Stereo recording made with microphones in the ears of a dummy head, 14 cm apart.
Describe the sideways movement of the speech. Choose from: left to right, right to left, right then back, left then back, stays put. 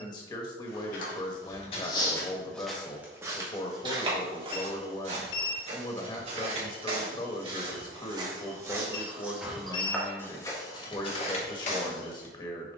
stays put.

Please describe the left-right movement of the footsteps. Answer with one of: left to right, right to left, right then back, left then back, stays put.
right then back.